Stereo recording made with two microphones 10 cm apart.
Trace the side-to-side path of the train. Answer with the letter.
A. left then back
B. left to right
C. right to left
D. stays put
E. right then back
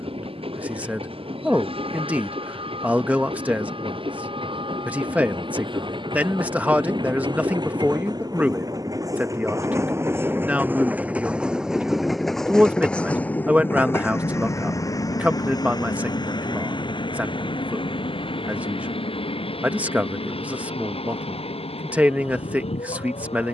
C.